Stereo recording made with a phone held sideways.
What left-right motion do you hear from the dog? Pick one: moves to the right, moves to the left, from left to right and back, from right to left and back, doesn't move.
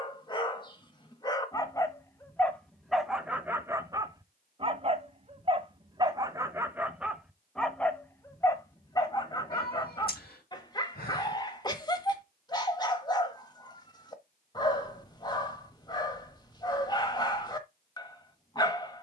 from left to right and back.